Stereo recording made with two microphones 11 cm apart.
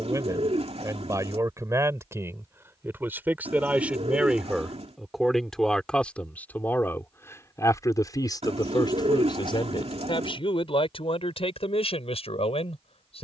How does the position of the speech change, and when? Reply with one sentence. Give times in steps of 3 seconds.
You can hear the speech on the right from 0 s, in the centre from 3 s and on the left from 6 s.